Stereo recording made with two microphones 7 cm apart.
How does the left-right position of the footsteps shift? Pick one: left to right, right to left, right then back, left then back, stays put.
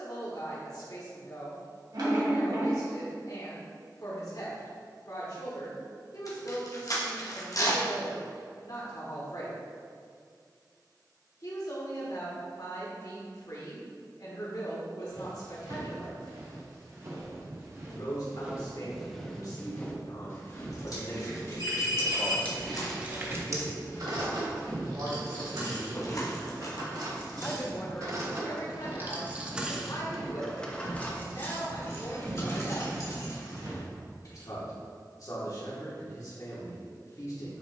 left then back.